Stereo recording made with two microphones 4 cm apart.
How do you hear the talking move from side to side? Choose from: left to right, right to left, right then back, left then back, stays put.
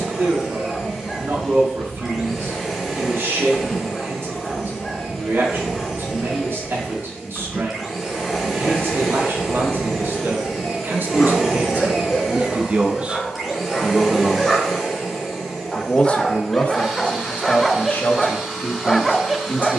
right to left.